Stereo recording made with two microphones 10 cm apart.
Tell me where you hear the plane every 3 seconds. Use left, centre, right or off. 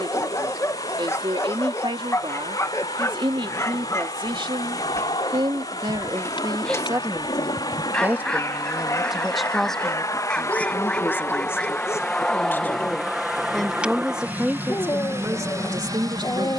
left, left, left, left, centre, right.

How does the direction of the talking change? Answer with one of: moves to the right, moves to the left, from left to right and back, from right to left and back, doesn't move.
from right to left and back.